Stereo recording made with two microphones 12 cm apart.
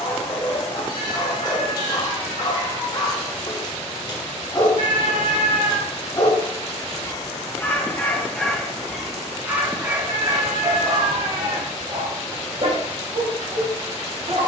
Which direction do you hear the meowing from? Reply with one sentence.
You can hear the meowing on the right.